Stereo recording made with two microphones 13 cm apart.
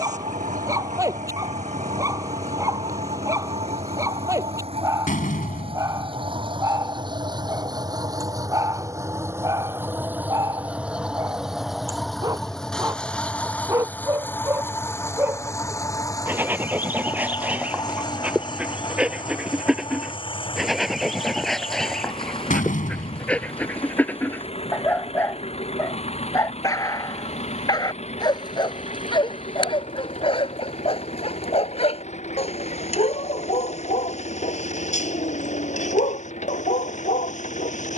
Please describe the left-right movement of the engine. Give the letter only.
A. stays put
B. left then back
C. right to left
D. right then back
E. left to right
C.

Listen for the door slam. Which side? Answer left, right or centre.
left.